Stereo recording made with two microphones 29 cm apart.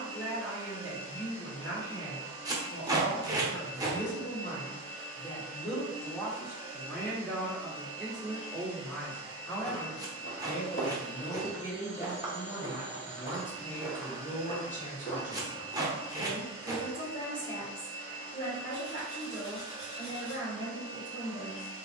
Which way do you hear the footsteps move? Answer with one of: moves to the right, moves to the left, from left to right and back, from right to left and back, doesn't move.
from left to right and back.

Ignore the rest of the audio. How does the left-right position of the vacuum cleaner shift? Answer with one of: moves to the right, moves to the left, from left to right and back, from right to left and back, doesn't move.
doesn't move.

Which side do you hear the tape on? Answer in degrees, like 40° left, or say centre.
10° right.